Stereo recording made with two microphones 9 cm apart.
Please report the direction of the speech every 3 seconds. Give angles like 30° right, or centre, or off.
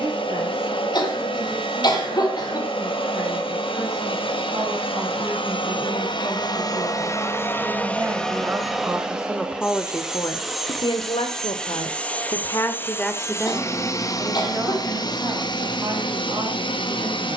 40° right, 40° right, 30° right, 40° left, centre, 40° right.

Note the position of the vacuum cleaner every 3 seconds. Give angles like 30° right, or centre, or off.
70° left, 70° left, 30° left, centre, 30° left, 60° left.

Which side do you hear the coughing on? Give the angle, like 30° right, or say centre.
50° left.